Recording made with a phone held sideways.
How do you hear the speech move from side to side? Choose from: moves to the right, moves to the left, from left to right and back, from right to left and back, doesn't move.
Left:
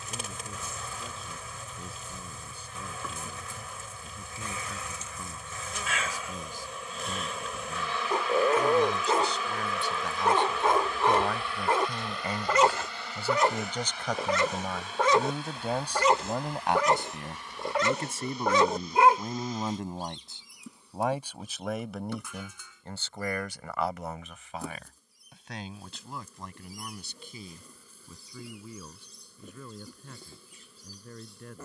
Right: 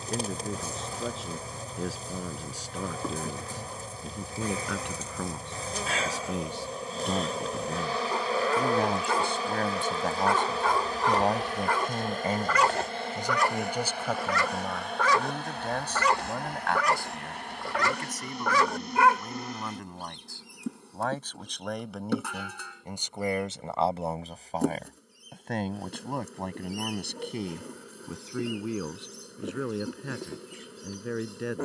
from right to left and back.